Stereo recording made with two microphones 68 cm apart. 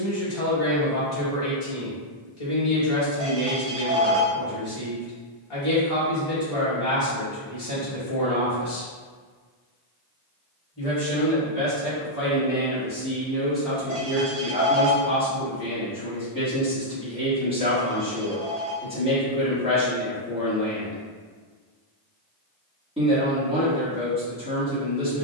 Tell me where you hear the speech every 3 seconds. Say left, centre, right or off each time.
left, left, left, left, centre, centre, centre, centre, centre.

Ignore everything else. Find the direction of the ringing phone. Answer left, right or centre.
right.